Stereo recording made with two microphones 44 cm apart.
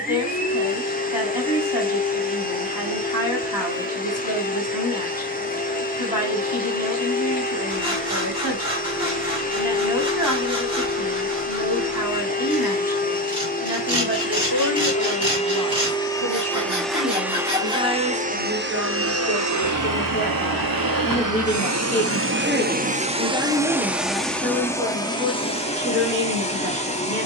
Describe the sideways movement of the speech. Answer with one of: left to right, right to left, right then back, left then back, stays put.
left to right.